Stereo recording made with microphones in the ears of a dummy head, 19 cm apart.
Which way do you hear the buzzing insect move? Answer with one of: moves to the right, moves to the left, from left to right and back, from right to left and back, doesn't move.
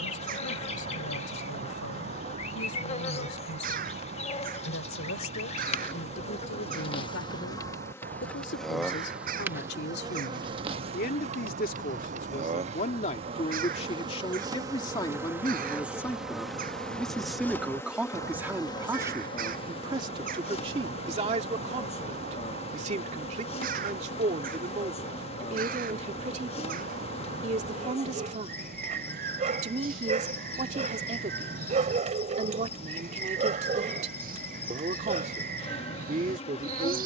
from left to right and back.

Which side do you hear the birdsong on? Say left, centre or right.
right.